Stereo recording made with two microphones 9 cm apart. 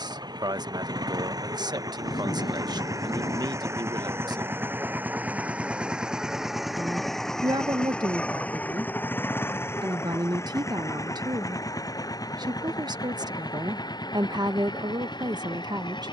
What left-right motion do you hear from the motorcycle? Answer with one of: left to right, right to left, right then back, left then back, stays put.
right to left.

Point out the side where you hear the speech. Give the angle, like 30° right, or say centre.
50° right.